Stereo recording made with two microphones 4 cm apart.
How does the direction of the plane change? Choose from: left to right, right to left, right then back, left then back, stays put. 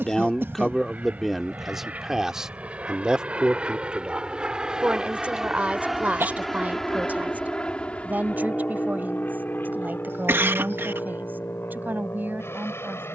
right to left.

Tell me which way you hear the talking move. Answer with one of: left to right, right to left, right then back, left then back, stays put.
left to right.